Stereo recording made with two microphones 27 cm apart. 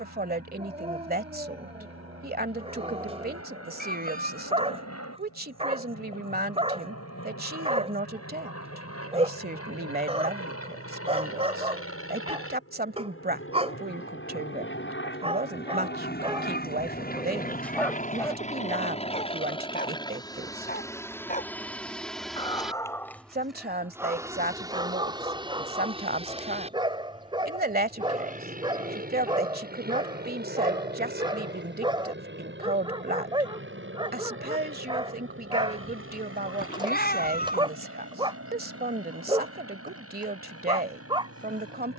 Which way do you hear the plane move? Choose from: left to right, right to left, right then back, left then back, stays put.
left to right.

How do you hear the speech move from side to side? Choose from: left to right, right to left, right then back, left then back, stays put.
stays put.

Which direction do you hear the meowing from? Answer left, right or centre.
left.